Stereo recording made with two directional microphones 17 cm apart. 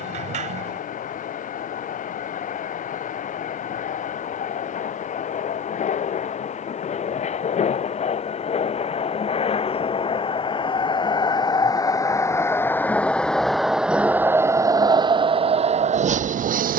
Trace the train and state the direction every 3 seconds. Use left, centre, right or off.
left, left, left, left, centre, right.